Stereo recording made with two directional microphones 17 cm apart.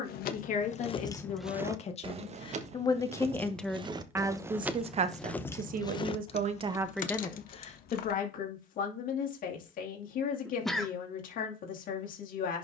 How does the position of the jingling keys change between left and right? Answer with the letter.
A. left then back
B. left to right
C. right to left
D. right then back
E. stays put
D.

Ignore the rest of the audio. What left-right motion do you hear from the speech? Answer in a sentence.
In this clip you hear the speech go right and come back.